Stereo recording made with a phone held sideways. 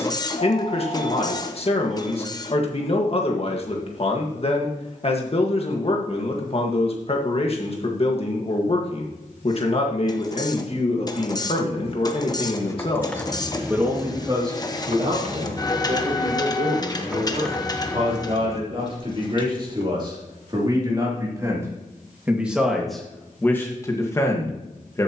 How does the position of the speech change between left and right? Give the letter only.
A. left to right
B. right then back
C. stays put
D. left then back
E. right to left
B.